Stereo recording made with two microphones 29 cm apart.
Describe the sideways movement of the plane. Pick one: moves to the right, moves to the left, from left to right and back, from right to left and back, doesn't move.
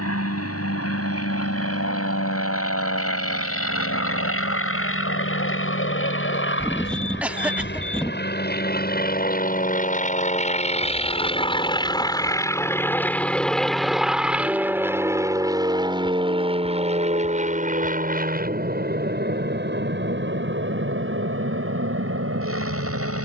moves to the right.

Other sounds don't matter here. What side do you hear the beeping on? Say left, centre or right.
centre.